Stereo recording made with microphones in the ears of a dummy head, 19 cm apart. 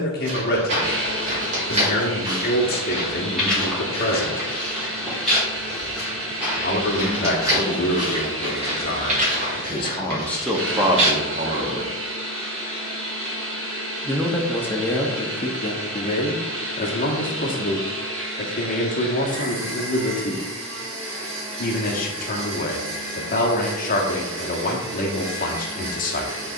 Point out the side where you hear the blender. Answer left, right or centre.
right.